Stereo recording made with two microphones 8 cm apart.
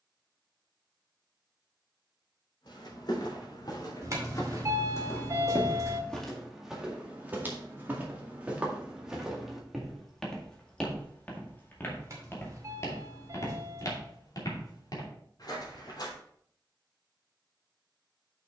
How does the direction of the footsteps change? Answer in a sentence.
You can hear the footsteps move from left to right and back again.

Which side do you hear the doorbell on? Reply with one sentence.
In this clip you hear the doorbell on the right.